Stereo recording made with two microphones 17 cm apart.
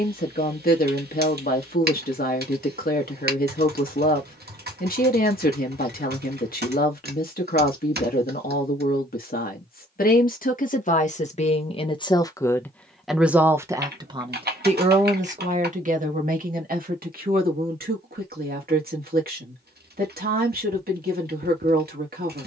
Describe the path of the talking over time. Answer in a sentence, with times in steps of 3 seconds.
You can hear the talking on the left from 0 s, in the centre from 12 s and on the right from 15 s.